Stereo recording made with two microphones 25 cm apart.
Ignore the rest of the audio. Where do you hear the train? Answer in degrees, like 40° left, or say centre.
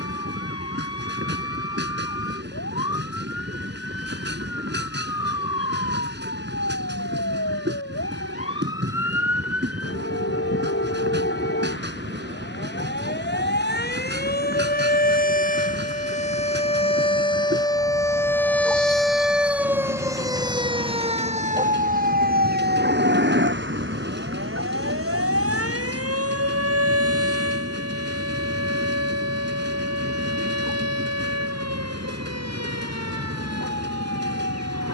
40° right.